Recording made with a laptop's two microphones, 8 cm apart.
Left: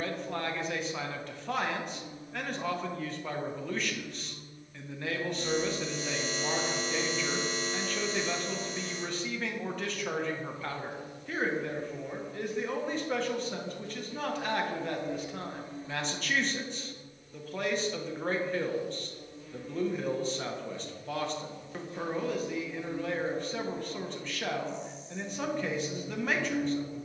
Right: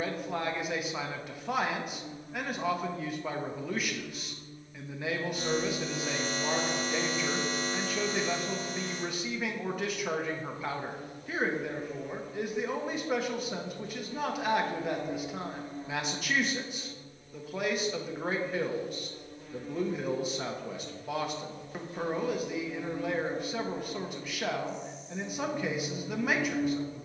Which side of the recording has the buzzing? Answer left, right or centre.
right.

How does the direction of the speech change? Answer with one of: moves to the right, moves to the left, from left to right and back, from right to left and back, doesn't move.
doesn't move.